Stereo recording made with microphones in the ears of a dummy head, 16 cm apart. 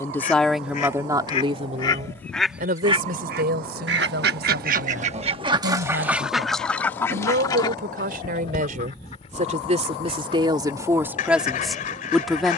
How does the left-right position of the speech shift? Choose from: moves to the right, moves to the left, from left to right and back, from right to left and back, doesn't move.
from left to right and back.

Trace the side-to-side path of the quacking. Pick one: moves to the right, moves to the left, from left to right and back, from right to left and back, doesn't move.
from left to right and back.